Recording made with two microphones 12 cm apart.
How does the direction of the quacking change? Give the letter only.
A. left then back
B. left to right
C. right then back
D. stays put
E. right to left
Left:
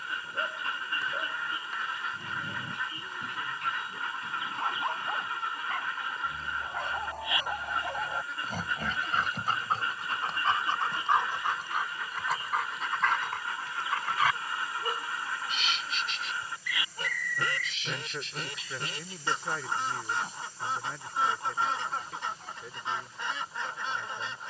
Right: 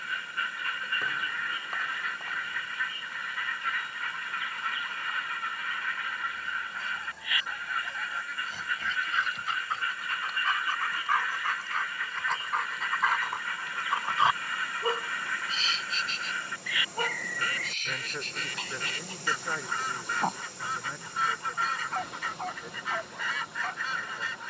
D.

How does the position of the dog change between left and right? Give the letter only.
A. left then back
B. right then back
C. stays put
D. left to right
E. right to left
D.